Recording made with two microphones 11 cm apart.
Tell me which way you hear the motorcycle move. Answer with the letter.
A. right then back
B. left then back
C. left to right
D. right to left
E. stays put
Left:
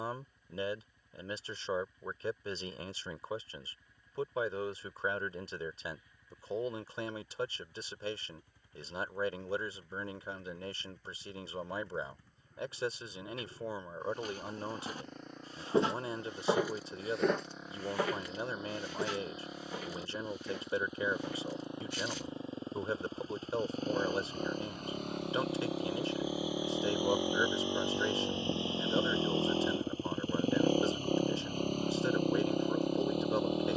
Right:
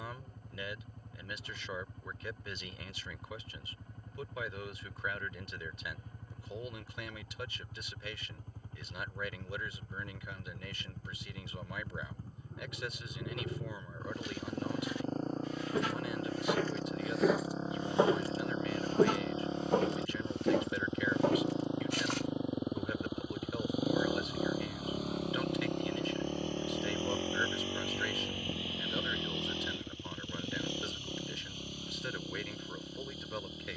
D.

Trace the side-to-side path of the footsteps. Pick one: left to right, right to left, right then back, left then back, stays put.
left to right.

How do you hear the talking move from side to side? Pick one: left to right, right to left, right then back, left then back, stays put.
stays put.